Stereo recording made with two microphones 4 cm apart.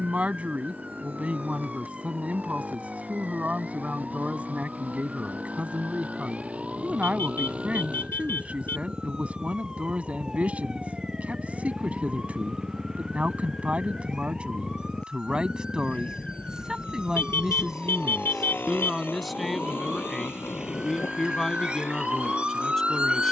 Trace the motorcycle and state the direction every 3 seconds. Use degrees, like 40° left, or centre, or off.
50° right, 40° right, 30° right, 10° right, 10° left, 40° left, 70° left, 80° left.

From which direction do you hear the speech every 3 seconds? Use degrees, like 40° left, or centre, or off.
30° right, 30° right, 30° right, 30° right, 30° right, 20° right, centre, 10° left.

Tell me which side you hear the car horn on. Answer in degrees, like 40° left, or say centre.
70° left.